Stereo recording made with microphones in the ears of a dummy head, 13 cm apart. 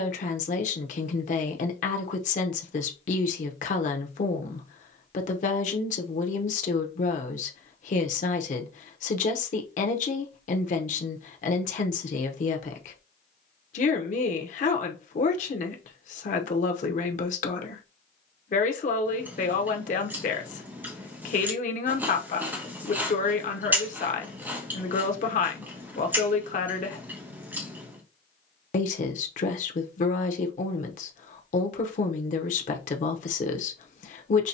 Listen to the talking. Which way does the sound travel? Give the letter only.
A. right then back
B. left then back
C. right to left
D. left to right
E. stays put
E.